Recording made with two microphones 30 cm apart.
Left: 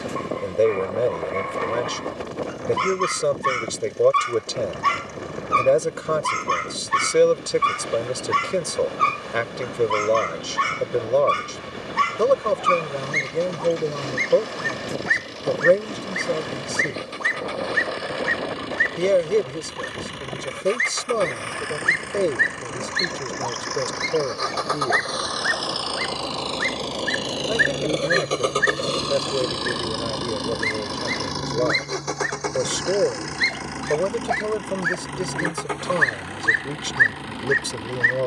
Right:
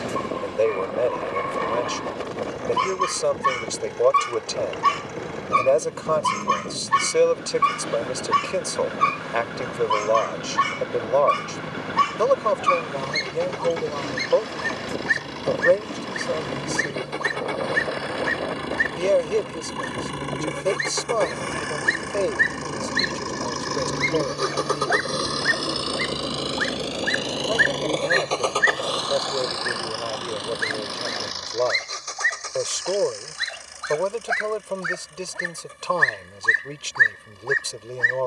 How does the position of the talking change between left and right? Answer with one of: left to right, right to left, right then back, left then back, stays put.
stays put.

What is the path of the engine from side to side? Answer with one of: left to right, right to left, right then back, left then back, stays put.
right to left.